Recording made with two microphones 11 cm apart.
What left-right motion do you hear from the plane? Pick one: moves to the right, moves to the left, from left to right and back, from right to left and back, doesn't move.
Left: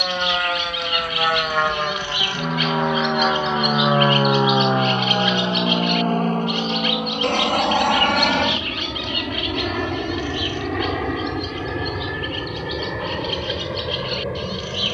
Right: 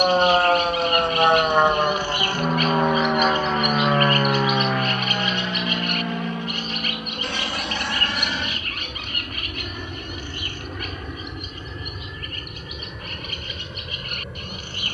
moves to the left.